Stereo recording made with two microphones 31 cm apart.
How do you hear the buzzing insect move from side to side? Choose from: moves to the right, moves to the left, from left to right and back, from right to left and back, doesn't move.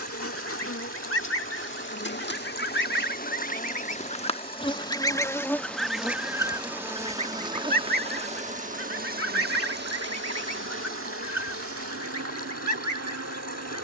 moves to the right.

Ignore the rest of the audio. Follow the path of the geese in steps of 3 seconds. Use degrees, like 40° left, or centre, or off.
50° left, 20° left, 20° right, 50° right, 70° right.